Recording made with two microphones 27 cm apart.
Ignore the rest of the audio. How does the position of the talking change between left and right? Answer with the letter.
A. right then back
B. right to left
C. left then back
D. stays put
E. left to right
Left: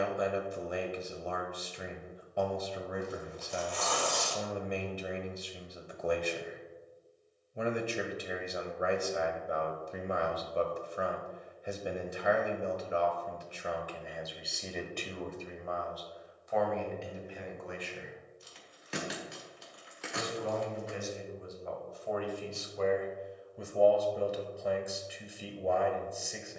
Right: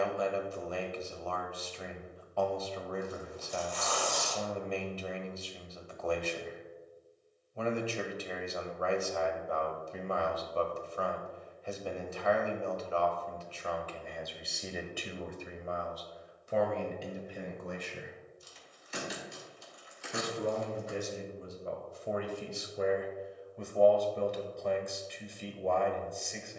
A.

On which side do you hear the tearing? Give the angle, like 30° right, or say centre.
60° left.